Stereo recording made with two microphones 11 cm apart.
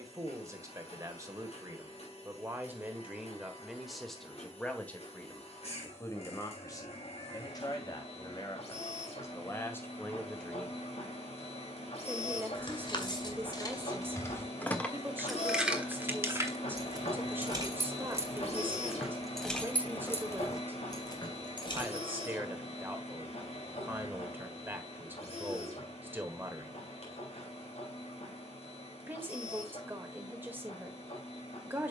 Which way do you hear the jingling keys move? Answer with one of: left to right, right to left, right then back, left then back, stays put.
right then back.